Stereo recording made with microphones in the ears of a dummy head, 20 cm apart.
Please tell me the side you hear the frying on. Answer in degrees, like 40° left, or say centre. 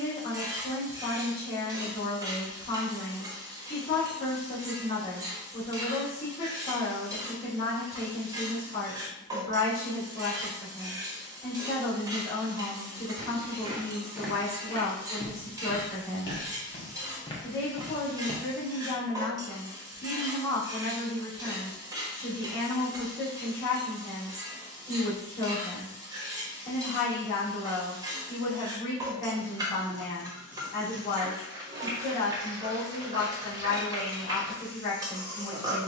20° right.